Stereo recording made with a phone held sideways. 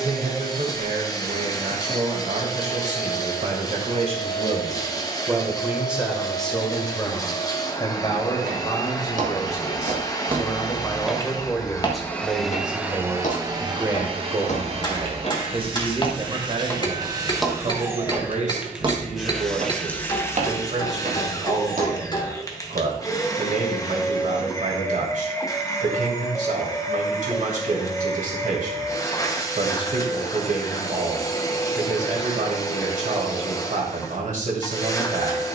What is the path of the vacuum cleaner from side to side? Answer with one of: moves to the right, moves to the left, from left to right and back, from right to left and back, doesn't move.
from left to right and back.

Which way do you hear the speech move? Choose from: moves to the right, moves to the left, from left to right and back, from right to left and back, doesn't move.
from right to left and back.